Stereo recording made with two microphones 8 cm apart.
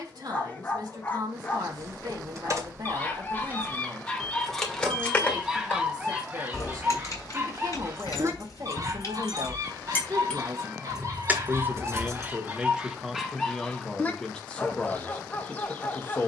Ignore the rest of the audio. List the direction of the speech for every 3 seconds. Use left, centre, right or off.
right, right, right, right, centre, left.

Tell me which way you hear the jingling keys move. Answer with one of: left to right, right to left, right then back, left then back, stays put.
left then back.